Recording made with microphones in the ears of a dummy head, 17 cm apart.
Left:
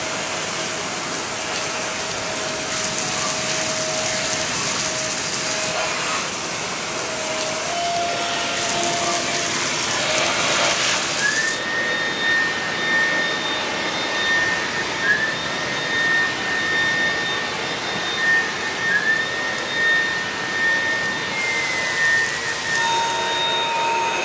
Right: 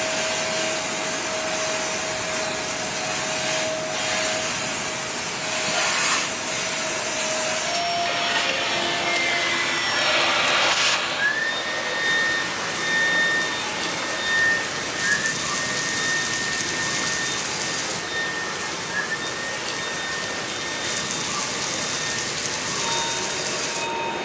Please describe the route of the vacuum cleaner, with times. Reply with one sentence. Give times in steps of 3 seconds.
In this clip you hear the vacuum cleaner on the right from 0 s, in the centre from 12 s and on the left from 15 s.